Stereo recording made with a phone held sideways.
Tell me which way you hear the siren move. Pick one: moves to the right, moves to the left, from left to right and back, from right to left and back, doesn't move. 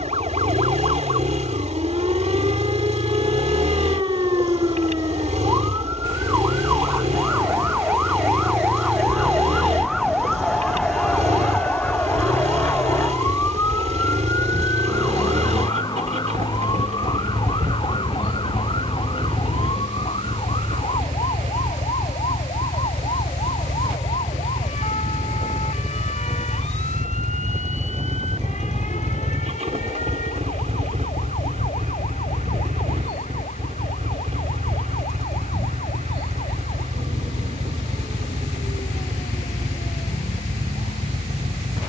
moves to the left.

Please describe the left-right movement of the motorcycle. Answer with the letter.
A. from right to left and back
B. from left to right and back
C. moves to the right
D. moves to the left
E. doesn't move
E.